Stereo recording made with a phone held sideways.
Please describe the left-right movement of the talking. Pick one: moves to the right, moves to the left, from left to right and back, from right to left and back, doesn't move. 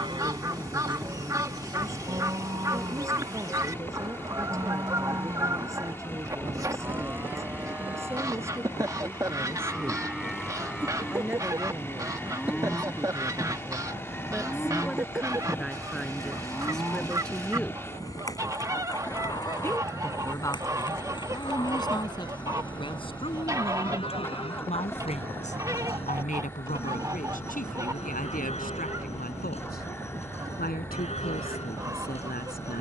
moves to the left.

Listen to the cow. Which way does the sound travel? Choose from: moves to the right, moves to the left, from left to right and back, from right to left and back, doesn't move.
moves to the left.